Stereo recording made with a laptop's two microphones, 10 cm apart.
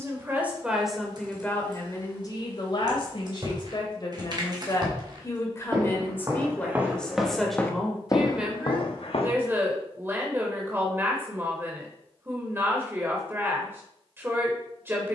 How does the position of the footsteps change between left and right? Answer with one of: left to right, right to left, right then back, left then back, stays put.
right to left.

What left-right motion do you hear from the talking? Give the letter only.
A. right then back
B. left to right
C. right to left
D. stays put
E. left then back
E.